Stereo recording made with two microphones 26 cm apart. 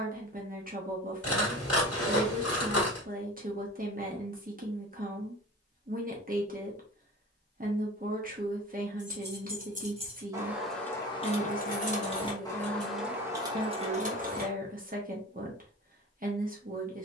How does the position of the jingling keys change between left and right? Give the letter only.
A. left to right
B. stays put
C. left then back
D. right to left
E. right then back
C.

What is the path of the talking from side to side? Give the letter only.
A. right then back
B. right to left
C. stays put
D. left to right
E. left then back
C.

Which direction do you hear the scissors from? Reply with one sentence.
In this clip you hear the scissors on the left.